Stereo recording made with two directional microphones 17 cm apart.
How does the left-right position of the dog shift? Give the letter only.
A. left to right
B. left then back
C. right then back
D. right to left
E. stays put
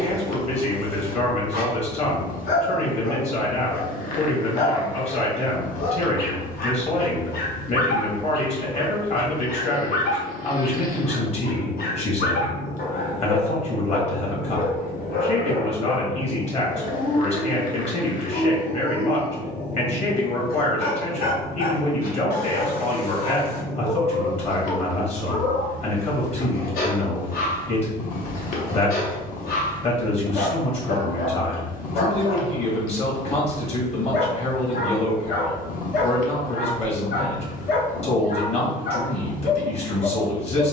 E.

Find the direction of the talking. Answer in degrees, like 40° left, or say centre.
40° left.